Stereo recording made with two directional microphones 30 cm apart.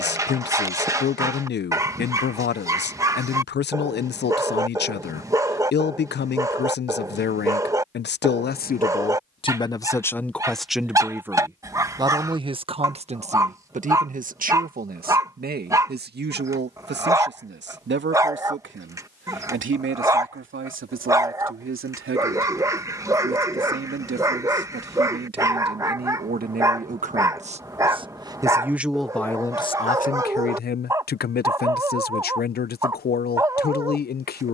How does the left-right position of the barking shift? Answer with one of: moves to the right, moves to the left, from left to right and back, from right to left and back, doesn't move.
doesn't move.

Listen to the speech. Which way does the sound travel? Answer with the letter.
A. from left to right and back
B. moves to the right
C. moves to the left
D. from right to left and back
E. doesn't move
A.